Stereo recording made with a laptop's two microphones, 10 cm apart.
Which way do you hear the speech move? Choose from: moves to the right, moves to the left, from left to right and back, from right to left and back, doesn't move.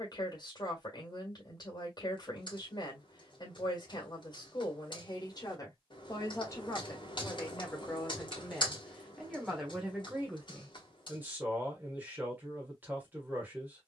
moves to the right.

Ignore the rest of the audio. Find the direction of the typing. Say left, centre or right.
left.